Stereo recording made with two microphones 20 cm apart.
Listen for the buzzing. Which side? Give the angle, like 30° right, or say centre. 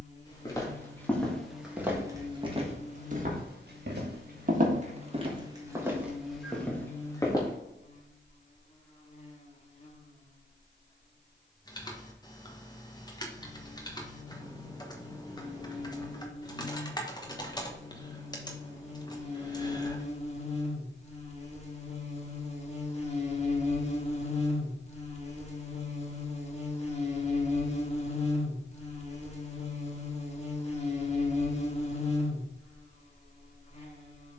30° left.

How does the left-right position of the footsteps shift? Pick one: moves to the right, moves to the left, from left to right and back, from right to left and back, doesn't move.
from left to right and back.